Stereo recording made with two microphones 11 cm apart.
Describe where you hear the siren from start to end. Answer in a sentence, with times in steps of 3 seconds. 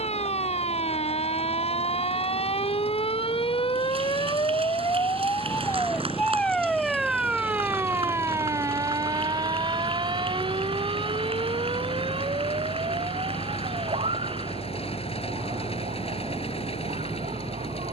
In this clip you hear the siren on the left from 0 s, in the centre from 6 s and on the right from 9 s.